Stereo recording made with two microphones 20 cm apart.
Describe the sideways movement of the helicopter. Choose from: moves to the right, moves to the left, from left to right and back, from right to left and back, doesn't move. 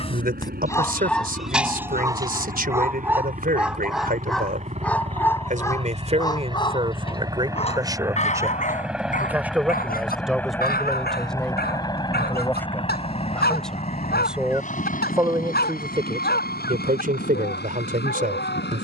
moves to the left.